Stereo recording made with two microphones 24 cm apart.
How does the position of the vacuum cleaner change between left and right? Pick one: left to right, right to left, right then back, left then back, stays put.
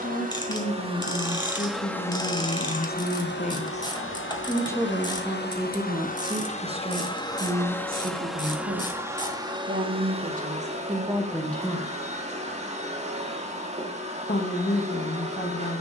left then back.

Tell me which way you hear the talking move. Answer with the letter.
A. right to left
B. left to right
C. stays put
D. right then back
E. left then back
D.